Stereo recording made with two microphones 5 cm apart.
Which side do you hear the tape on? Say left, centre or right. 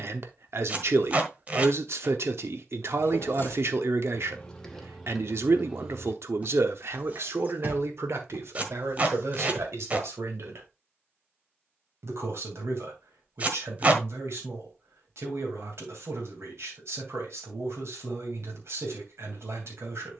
right.